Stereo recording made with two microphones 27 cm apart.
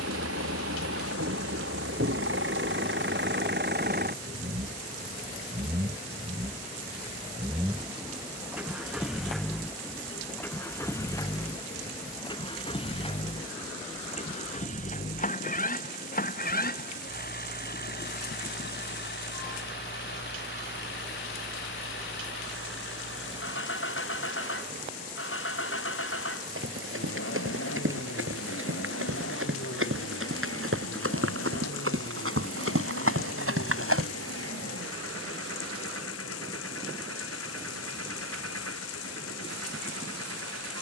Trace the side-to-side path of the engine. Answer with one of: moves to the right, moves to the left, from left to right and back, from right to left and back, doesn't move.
moves to the left.